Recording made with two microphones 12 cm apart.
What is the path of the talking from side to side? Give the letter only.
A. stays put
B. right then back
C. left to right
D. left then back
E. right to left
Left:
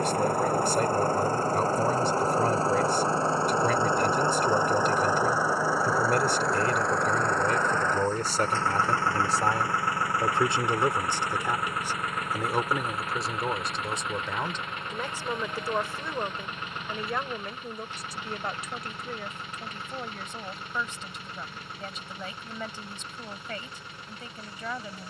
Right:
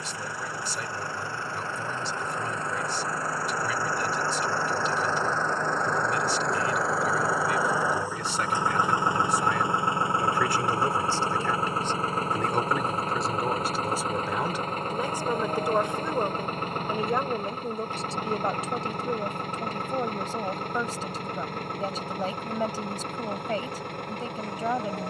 C.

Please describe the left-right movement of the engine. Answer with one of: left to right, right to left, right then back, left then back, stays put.
left to right.